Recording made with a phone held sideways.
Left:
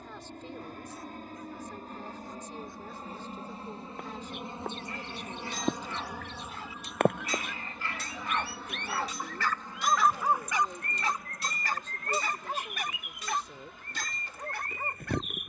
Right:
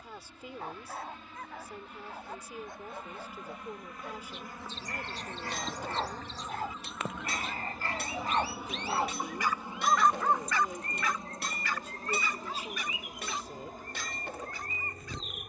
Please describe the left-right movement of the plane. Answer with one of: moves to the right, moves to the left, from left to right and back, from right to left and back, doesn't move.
moves to the right.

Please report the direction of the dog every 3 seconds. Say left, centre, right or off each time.
right, right, right, centre, left.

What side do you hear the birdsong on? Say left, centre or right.
left.